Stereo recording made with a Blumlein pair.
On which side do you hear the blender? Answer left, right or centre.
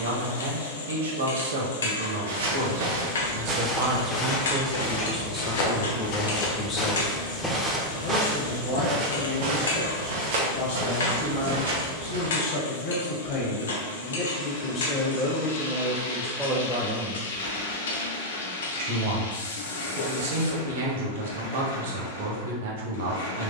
left.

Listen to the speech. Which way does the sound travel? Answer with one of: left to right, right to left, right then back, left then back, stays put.
left then back.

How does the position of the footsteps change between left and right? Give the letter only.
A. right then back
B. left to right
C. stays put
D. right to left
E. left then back
E.